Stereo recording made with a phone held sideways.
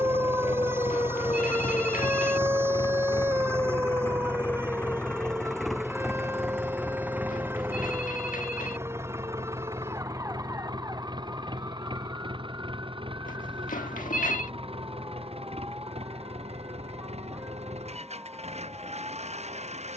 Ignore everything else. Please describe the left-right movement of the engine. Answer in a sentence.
You can hear the engine go from the left side to the right.